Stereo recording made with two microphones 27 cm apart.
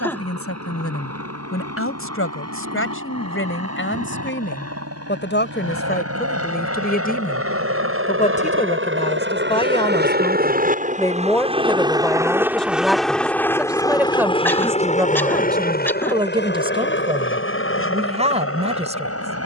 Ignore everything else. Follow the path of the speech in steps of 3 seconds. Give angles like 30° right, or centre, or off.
50° left, 40° left, 30° left, 10° left, centre, 20° right, 20° right.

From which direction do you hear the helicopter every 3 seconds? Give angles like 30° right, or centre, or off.
80° right, 70° right, 60° right, 30° right, 10° left, 40° left, 50° left.